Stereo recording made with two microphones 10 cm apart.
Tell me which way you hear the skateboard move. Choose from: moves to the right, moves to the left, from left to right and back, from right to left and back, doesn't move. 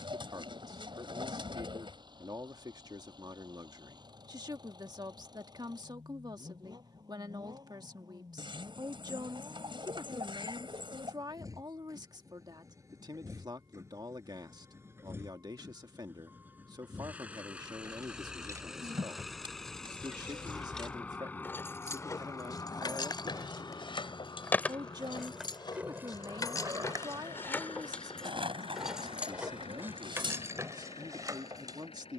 moves to the right.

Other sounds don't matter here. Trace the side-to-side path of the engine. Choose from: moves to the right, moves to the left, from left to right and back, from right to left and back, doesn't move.
moves to the left.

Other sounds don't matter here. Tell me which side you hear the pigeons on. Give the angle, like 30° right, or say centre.
60° right.